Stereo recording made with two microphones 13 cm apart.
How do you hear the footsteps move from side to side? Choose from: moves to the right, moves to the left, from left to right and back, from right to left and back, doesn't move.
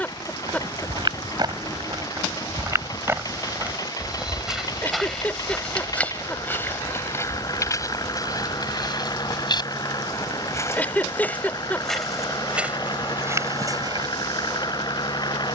from right to left and back.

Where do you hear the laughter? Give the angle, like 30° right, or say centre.
10° left.